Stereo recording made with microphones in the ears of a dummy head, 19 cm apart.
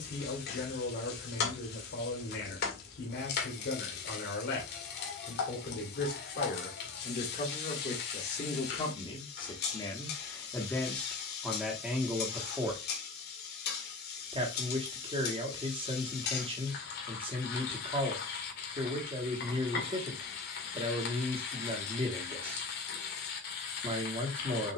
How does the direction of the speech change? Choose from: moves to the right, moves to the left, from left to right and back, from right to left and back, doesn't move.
moves to the right.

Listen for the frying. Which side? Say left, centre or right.
left.